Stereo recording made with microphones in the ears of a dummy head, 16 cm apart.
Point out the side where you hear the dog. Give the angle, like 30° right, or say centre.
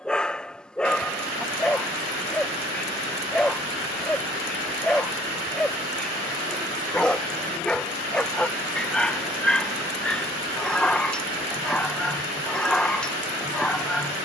10° left.